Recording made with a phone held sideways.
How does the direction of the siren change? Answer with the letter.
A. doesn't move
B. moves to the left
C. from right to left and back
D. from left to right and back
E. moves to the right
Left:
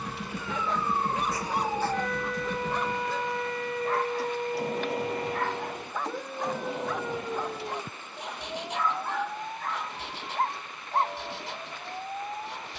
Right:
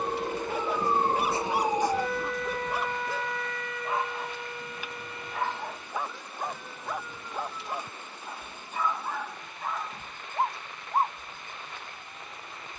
B.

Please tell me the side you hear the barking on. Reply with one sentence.
In this clip you hear the barking in the centre.